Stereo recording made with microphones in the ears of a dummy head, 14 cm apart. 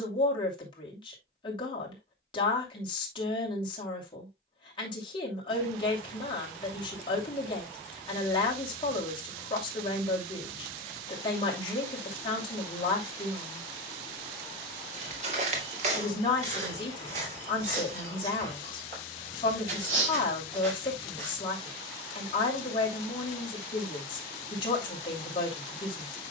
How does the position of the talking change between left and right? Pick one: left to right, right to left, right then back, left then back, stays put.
stays put.